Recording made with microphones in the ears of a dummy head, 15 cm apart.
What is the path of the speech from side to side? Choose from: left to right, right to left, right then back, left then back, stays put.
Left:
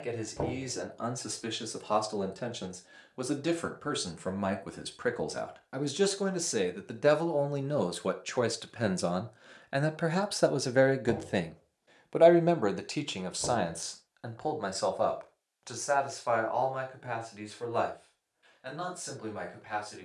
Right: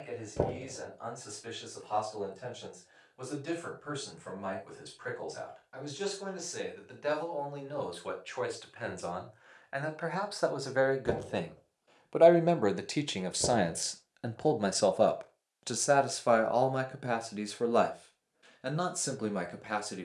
left to right.